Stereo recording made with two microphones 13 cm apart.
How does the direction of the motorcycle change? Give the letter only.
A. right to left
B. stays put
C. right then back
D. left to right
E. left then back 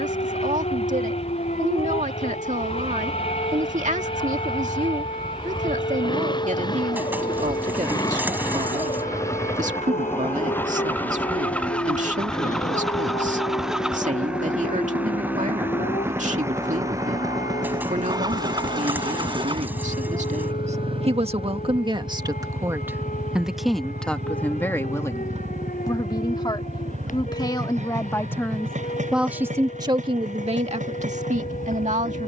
D.